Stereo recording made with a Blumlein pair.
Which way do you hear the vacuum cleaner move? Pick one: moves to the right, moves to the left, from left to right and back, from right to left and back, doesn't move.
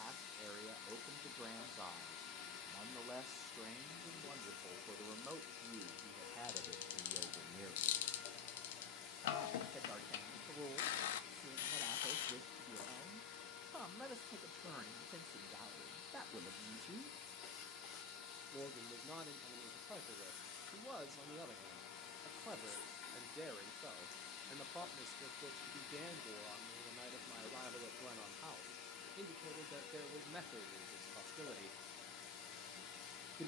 doesn't move.